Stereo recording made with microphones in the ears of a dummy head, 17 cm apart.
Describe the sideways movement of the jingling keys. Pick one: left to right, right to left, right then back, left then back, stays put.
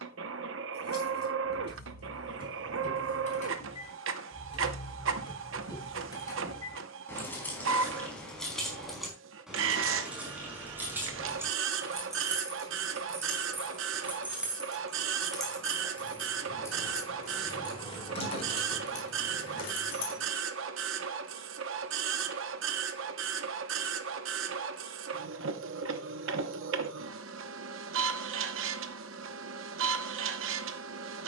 right then back.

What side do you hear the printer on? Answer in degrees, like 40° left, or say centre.
70° right.